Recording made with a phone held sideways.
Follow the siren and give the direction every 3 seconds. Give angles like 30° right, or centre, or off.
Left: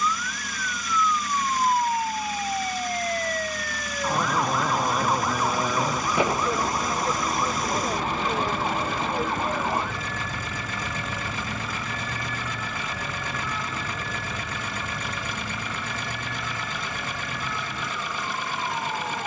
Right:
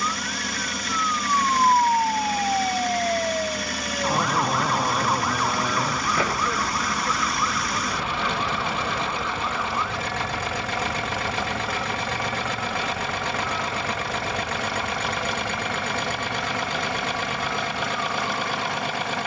40° right, centre, 30° left, 50° left, 60° left, 70° left, 70° left.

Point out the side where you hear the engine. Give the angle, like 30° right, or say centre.
70° right.